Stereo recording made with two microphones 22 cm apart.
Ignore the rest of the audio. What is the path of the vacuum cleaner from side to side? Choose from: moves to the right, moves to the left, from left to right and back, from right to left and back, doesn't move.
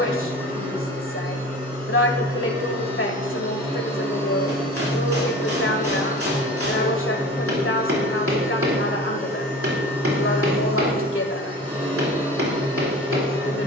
doesn't move.